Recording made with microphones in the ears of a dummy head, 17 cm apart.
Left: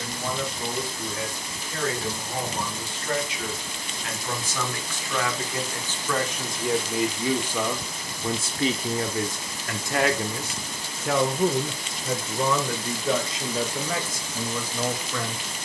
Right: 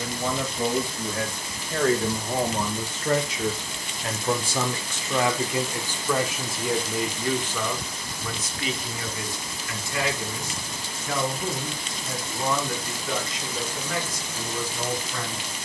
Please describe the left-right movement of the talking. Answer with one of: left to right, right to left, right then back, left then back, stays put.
right to left.